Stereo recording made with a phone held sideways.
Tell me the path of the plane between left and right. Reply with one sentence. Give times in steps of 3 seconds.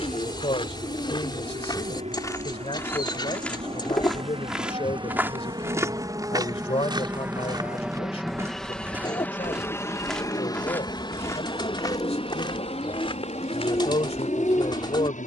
In this clip you hear the plane on the right from 0 s, in the centre from 6 s and on the left from 9 s.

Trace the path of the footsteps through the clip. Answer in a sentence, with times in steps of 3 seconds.
You can hear the footsteps on the left from 0 s, in the centre from 3 s, on the right from 6 s, in the centre from 9 s and on the left from 12 s.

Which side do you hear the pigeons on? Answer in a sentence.
You can hear the pigeons on the left.